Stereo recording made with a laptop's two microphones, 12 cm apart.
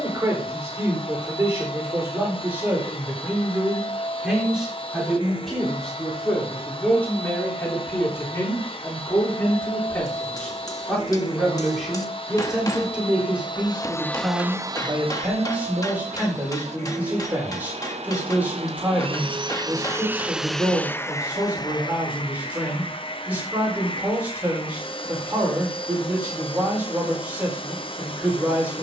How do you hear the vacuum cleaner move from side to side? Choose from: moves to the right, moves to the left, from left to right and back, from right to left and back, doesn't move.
from left to right and back.